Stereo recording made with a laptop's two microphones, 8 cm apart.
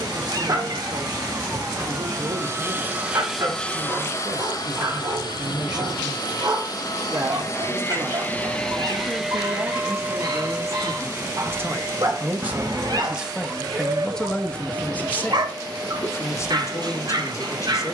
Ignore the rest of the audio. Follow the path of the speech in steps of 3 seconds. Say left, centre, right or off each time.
right, right, right, right, centre, left.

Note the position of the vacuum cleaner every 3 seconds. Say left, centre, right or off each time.
right, left, left, right, right, right.